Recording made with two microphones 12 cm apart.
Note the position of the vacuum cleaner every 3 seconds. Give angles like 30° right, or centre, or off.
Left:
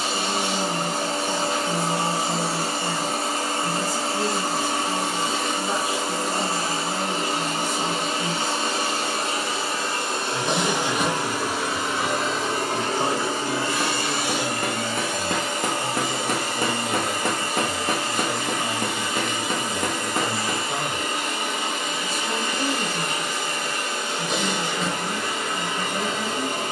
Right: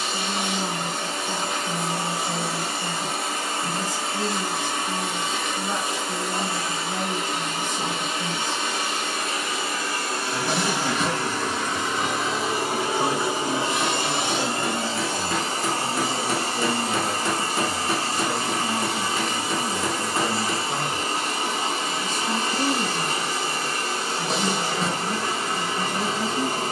30° left, 30° left, 30° left, 20° left, 20° right, 30° right, 30° right, 30° right, 30° right.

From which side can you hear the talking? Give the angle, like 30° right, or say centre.
10° left.